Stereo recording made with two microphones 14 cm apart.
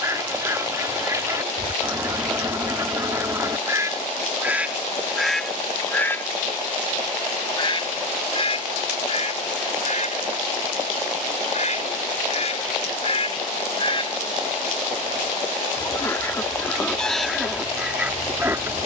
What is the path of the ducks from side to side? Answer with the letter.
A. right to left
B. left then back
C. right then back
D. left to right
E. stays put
B.